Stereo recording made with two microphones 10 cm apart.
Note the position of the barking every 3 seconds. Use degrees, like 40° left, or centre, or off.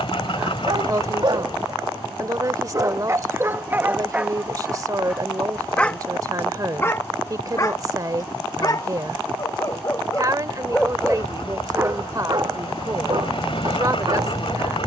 50° right, 10° right, 30° left, 10° left, 50° right.